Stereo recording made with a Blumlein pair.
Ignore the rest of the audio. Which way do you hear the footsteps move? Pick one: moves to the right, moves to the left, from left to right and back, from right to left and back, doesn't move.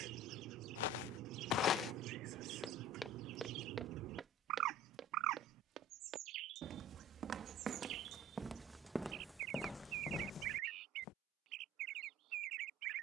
from left to right and back.